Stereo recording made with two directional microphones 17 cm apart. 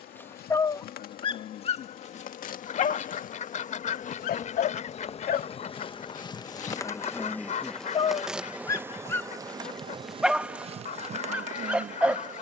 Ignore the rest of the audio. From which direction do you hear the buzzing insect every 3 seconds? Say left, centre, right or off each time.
left, left, centre, right.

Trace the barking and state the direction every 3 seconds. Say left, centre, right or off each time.
left, left, left, centre.